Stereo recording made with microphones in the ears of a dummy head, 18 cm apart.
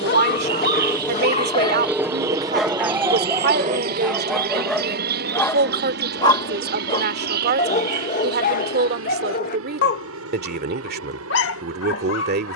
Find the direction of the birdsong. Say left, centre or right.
right.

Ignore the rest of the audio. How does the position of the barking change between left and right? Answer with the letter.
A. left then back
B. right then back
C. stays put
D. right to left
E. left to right
B.